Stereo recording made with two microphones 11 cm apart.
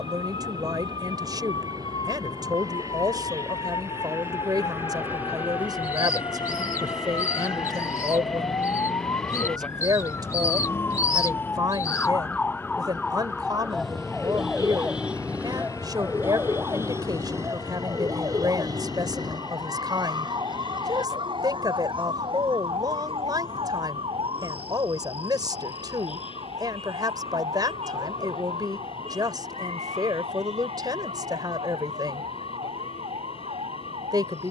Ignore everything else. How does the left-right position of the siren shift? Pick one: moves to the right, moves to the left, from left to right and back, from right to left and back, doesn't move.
moves to the right.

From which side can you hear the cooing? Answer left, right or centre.
left.